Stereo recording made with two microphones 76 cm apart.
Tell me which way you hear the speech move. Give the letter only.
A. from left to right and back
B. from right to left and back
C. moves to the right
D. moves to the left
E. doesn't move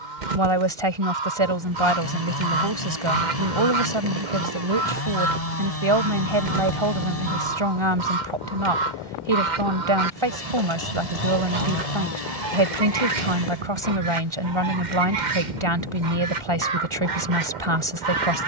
E.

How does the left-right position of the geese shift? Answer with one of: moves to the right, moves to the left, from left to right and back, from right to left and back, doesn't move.
doesn't move.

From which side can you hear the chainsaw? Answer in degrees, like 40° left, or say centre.
50° left.